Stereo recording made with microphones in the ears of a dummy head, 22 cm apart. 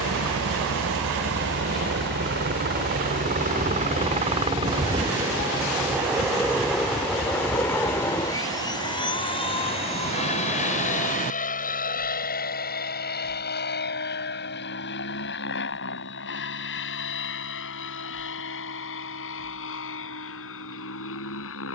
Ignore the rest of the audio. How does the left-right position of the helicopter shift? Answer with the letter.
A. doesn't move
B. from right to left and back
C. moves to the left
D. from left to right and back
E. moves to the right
C.